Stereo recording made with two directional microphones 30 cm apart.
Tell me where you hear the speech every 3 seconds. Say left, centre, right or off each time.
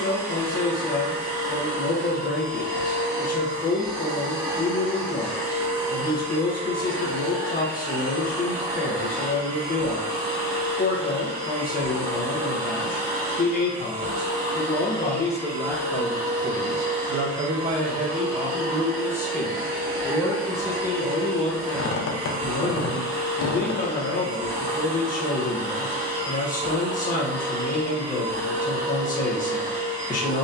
left, left, left, left, left, centre, centre, left, left, left.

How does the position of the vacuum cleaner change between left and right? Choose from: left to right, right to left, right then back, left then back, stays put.
stays put.